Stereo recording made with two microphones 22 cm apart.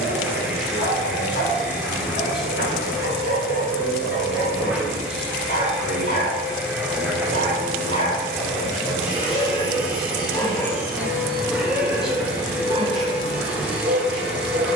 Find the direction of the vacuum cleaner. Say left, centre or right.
centre.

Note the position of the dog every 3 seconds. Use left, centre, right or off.
left, left, left, centre, right.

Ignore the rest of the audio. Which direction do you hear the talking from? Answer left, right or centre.
centre.